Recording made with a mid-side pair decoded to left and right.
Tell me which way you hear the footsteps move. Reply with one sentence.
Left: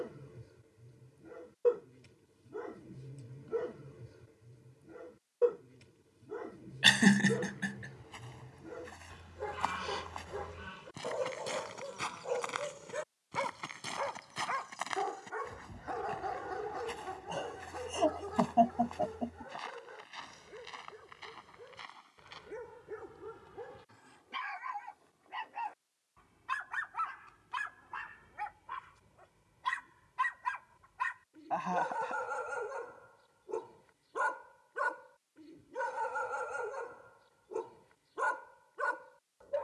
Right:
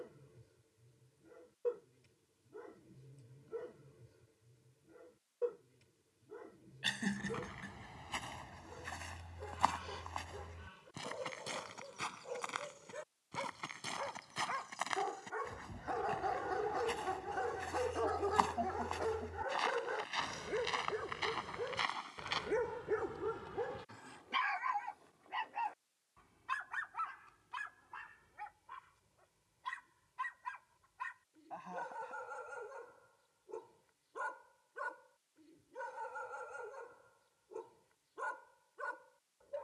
In this clip you hear the footsteps go left and come back.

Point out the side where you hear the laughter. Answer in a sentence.
You can hear the laughter on the left.